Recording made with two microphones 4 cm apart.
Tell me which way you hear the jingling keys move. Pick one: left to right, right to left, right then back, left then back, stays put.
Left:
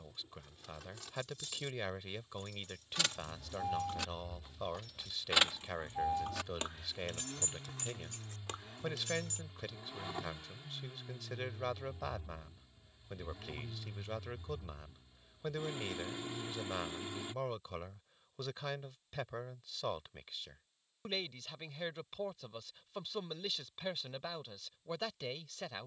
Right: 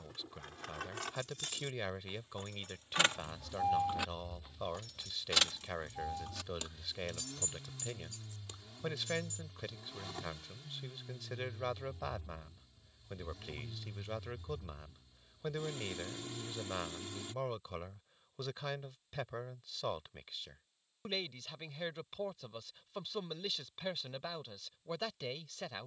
right to left.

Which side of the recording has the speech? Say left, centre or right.
centre.